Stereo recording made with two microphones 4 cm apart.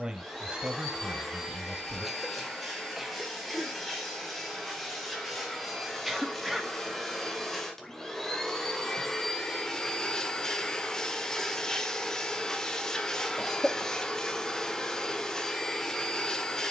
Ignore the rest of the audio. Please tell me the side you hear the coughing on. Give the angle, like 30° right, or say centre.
centre.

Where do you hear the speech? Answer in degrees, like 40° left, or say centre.
20° right.